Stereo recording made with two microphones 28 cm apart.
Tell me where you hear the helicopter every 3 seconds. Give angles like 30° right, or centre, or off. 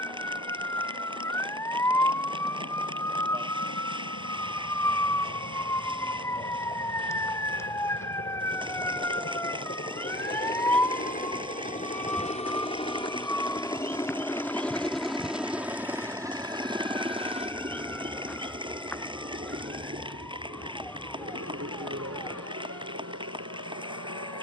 60° left, 50° left, 50° left, 30° left, 10° left, 10° right, 40° right, 50° right.